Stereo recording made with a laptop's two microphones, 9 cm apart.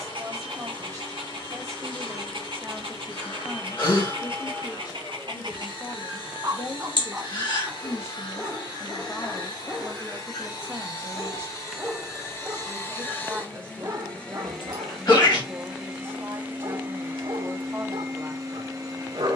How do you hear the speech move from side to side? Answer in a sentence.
In this clip you hear the speech move from right to left and back again.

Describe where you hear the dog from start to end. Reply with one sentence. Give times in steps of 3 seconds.
You can hear the dog on the right from 0 s, in the centre from 6 s and on the right from 12 s.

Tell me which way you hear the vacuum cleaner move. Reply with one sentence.
In this clip you hear the vacuum cleaner go from the left side to the right.